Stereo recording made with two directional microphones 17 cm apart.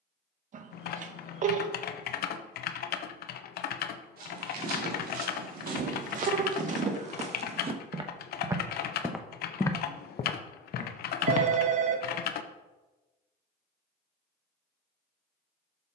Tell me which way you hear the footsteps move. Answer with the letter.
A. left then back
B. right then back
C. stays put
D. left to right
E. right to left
E.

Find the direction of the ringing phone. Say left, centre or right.
right.